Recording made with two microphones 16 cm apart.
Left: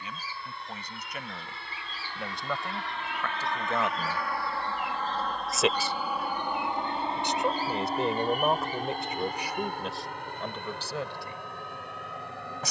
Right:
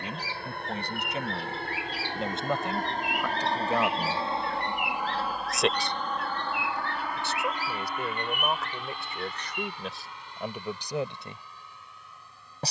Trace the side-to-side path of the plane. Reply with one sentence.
In this clip you hear the plane travel towards the left.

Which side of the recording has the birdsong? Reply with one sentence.
You can hear the birdsong on the right.